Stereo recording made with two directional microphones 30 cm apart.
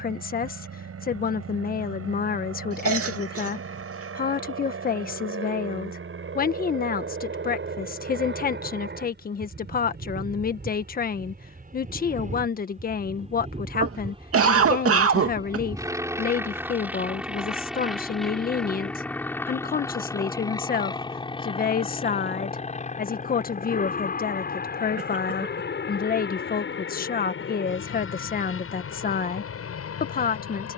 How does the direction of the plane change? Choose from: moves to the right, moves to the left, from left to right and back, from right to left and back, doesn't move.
moves to the left.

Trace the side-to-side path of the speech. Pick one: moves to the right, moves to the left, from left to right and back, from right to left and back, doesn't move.
doesn't move.